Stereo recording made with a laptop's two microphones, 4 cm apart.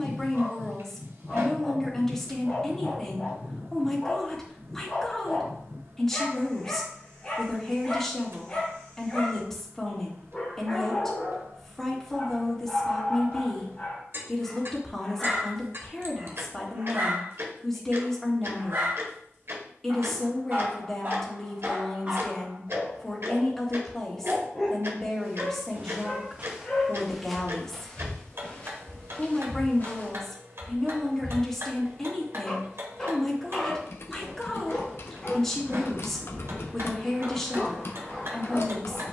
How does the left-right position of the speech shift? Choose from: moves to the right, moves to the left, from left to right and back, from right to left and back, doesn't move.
doesn't move.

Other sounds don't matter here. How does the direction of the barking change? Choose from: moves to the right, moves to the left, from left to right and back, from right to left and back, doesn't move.
from left to right and back.